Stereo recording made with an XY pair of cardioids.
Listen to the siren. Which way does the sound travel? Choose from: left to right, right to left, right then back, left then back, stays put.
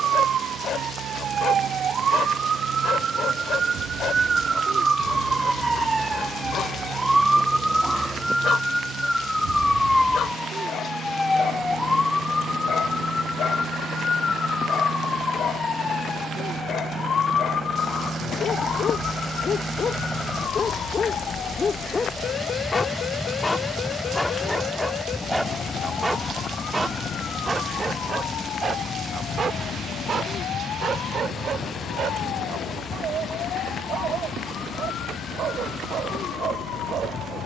right to left.